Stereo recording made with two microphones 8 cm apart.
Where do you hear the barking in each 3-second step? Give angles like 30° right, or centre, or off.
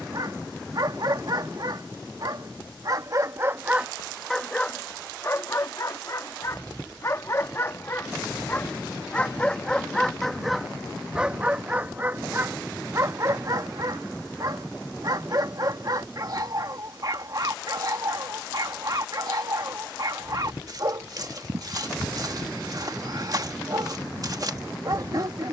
50° right, 10° left, 30° left, centre, 40° right, 50° right, 50° right, 50° right, 50° right.